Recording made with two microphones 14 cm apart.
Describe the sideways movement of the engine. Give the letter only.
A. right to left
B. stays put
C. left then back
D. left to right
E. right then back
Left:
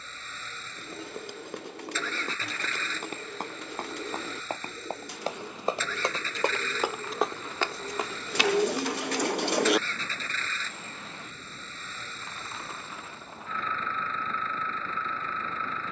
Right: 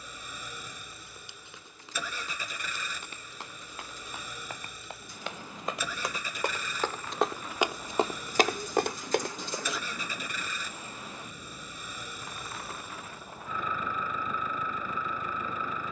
B.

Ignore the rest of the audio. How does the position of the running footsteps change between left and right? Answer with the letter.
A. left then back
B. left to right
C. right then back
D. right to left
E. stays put
B.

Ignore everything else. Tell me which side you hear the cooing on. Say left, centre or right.
left.